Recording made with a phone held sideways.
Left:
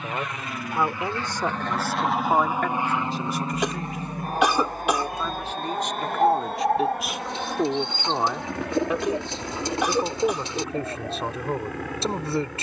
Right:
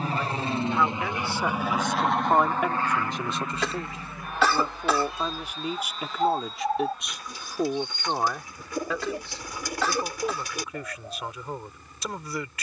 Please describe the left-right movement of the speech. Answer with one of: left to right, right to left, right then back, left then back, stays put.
right then back.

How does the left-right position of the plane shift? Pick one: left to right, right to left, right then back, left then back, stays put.
right to left.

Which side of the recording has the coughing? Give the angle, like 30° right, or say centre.
20° left.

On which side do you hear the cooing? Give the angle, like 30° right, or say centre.
20° left.